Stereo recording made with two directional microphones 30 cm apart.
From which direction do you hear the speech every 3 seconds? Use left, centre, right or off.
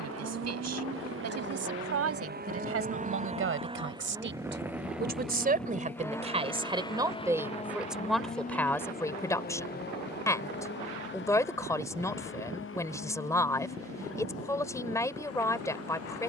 right, right, centre, centre, centre, centre.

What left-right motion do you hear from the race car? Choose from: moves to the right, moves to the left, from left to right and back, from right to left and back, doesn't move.
moves to the left.